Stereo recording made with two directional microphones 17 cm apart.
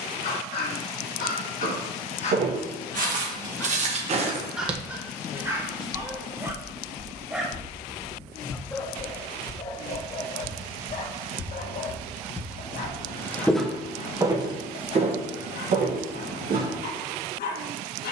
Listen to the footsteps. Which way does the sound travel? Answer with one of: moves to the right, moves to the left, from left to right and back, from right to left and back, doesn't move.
from right to left and back.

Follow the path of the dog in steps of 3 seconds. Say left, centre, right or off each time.
left, centre, centre, left, left, left.